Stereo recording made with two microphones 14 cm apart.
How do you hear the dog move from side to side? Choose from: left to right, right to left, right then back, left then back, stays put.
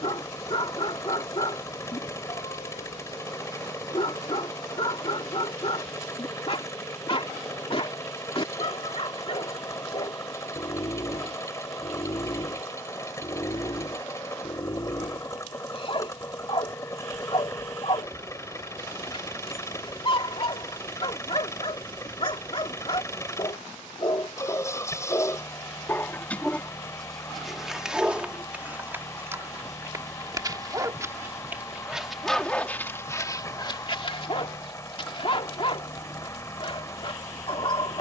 right then back.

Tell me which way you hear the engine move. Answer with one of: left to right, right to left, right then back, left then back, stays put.
stays put.